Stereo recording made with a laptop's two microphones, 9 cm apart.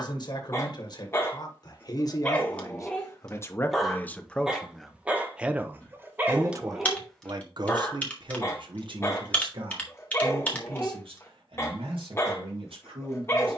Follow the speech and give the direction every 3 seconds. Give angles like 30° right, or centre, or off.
50° left, 10° left, 50° right, 70° right, 80° right.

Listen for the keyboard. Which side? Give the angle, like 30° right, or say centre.
20° left.